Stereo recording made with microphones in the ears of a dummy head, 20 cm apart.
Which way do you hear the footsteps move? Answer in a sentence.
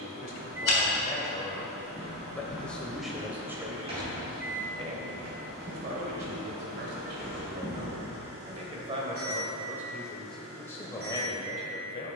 In this clip you hear the footsteps go right and come back.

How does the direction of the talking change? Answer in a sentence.
You can hear the talking go right and come back.